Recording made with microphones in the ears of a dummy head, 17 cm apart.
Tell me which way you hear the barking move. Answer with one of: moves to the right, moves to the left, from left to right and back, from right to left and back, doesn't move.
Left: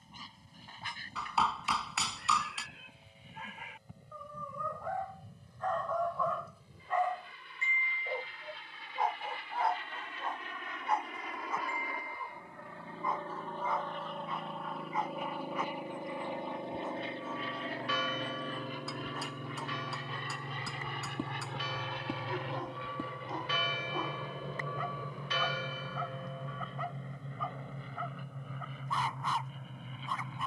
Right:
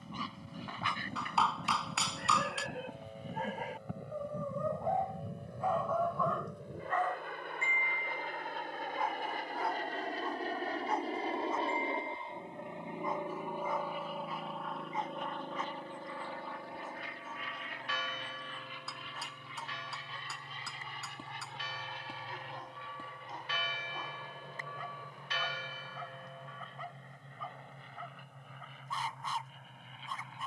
moves to the left.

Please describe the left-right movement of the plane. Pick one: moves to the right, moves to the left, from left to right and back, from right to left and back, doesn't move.
moves to the left.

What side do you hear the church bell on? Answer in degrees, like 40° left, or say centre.
80° left.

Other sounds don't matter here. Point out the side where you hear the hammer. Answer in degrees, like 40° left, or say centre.
centre.